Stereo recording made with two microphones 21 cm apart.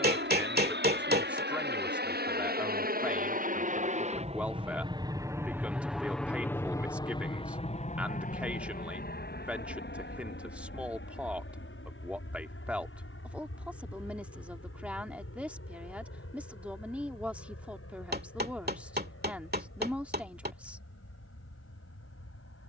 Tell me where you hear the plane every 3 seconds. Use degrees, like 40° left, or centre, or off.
60° right, 30° right, 30° left, 60° left, 70° left, 70° left, 80° left, 80° left.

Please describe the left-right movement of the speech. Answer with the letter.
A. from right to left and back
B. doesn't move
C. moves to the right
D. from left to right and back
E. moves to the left
B.